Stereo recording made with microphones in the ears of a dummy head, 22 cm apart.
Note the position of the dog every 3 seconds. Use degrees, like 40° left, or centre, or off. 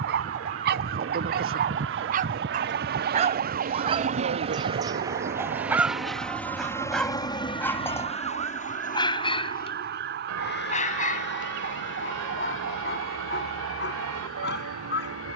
40° right, 20° right, 10° left, 30° left, 40° left.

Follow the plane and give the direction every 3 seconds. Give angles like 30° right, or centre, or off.
60° right, 20° right, 20° left, 40° left, 50° left.